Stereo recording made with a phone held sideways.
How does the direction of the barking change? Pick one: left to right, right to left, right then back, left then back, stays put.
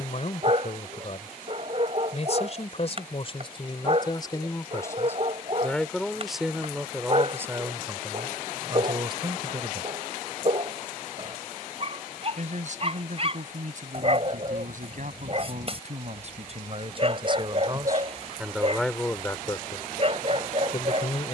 stays put.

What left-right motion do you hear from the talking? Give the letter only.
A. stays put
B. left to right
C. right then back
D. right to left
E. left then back
C.